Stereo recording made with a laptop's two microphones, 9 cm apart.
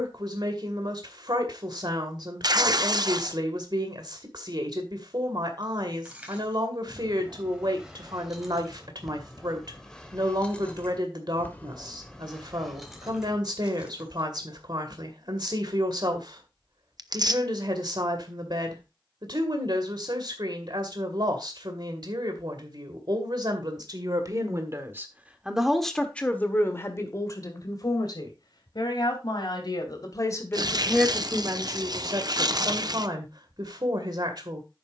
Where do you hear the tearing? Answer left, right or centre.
right.